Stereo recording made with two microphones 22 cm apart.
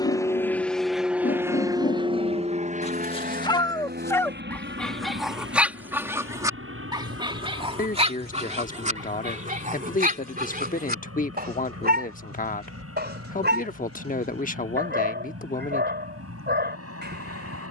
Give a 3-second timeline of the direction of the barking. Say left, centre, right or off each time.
left, centre, right, right, right, right.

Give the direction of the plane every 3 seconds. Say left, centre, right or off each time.
centre, right, right, right, right, right.